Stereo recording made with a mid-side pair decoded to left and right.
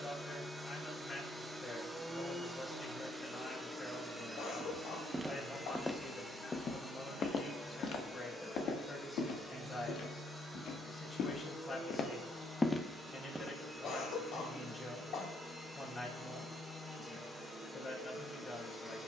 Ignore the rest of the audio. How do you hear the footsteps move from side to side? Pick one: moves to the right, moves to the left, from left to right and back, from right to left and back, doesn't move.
from right to left and back.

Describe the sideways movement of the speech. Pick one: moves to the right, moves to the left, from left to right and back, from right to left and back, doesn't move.
doesn't move.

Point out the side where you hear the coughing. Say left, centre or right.
left.